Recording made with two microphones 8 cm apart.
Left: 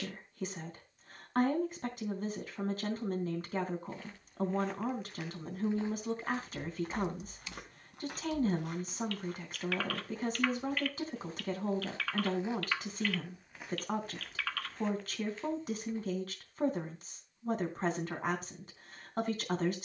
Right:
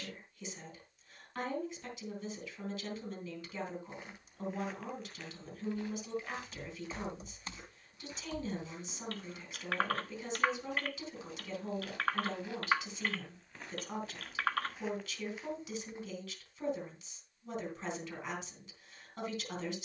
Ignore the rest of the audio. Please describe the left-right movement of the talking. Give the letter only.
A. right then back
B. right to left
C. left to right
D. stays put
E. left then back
D.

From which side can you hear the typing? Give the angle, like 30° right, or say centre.
40° right.